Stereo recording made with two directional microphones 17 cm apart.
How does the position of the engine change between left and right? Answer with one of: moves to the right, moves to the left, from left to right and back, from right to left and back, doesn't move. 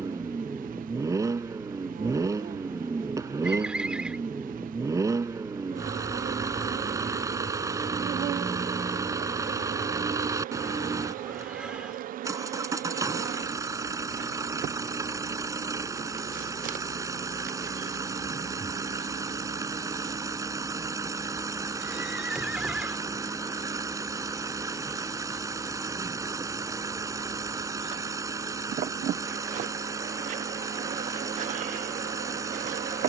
doesn't move.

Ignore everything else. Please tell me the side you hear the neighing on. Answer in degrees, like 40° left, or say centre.
10° right.